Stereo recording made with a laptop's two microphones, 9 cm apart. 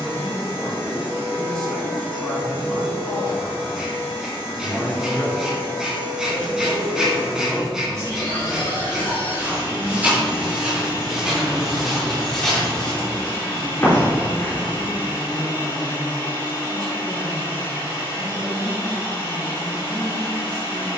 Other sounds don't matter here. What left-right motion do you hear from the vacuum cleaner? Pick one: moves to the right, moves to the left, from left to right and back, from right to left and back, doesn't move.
doesn't move.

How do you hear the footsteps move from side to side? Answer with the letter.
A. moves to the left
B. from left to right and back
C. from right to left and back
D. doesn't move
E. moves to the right
A.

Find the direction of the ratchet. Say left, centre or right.
centre.